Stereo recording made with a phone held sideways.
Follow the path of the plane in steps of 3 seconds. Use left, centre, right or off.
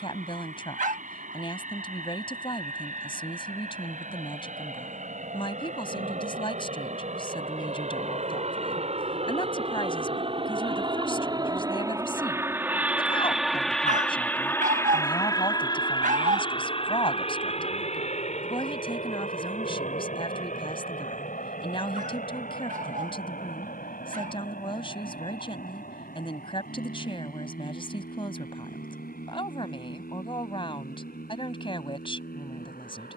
right, right, right, right, centre, left, left, left, left, left, left.